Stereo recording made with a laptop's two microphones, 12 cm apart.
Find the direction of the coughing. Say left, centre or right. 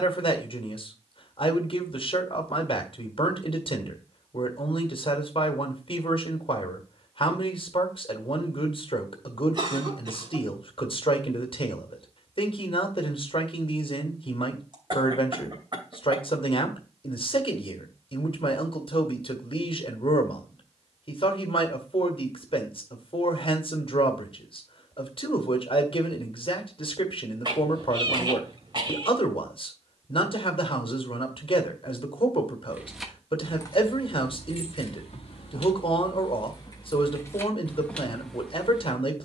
right.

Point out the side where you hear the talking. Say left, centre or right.
left.